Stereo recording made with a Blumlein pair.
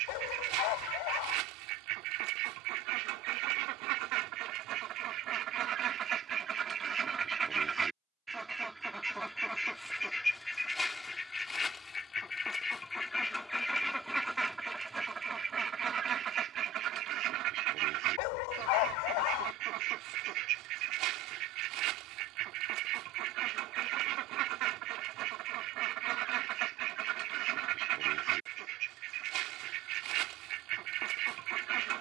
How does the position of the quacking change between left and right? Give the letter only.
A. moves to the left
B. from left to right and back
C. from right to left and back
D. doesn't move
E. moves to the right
C.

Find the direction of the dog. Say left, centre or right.
left.